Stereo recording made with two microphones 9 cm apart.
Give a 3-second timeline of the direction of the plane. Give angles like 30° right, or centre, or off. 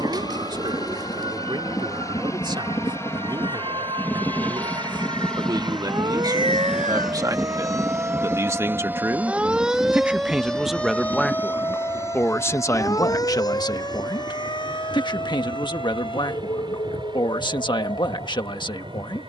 40° left, 20° left, 10° right, 30° right, 40° right, 50° right, 50° right.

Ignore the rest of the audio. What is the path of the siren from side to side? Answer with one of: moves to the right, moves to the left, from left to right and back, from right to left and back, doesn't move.
moves to the left.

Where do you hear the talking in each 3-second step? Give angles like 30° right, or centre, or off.
60° right, 50° right, 40° right, centre, 40° left, 60° left, 60° left.